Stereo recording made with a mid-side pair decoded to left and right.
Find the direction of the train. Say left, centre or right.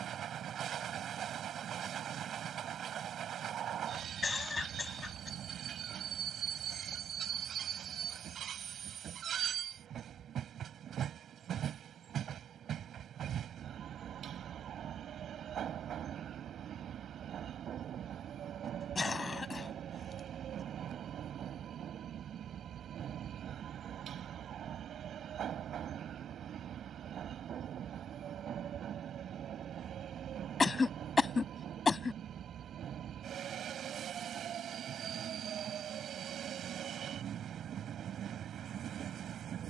right.